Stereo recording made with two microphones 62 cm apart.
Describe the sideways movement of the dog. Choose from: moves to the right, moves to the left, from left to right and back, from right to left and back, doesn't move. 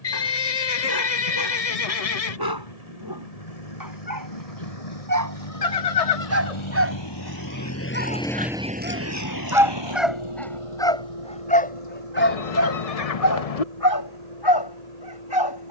moves to the left.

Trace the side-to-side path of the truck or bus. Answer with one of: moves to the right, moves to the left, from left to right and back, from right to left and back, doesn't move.
moves to the right.